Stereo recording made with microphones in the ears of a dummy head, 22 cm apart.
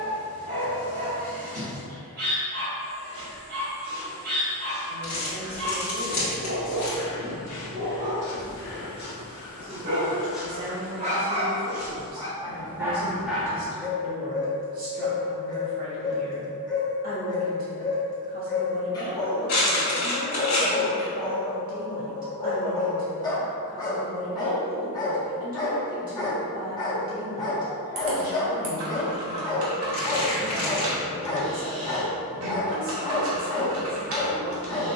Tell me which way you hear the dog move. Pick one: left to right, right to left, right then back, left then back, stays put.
right to left.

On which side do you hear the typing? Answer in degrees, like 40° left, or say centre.
60° right.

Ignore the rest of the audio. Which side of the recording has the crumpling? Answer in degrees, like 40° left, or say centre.
40° left.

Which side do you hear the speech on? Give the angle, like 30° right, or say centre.
40° right.